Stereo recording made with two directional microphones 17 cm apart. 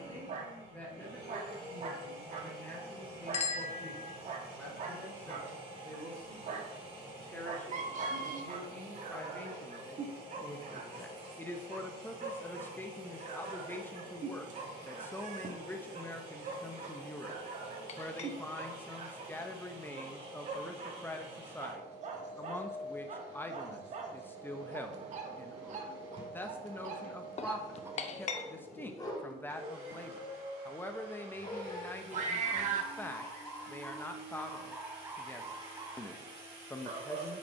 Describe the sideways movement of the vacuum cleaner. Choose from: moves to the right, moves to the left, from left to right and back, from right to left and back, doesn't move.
doesn't move.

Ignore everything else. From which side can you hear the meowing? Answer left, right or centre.
right.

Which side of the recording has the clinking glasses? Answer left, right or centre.
left.